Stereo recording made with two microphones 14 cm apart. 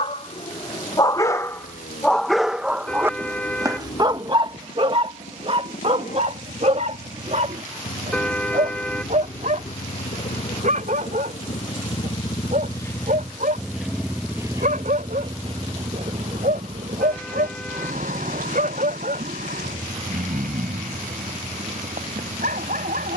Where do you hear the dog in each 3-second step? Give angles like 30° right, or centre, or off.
10° left, 30° right, 60° right, 60° right, 70° right, 70° right, 70° right, 80° right.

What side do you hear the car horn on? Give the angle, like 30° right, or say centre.
10° left.